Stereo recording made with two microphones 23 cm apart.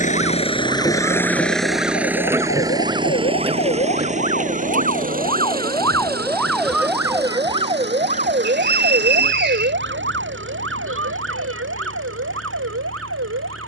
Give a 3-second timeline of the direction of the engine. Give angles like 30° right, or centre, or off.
centre, 30° right, 50° right, 50° right, 60° right.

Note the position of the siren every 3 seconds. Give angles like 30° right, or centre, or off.
60° left, 40° left, 20° right, 60° right, 70° right.